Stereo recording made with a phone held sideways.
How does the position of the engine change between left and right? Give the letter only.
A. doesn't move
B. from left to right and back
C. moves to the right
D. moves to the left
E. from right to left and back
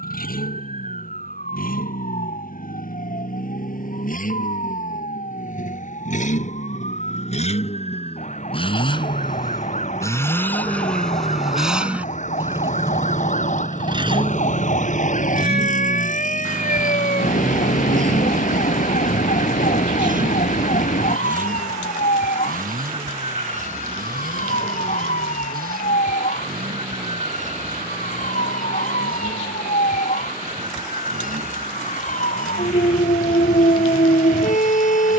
C.